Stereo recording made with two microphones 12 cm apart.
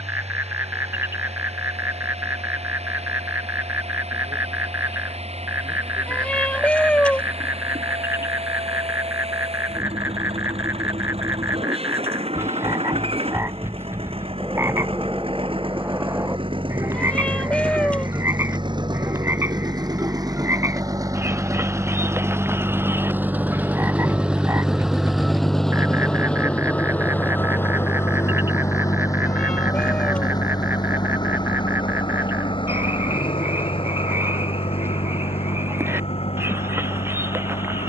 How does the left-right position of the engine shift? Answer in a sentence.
In this clip you hear the engine move to the left.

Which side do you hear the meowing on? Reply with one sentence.
You can hear the meowing in the centre.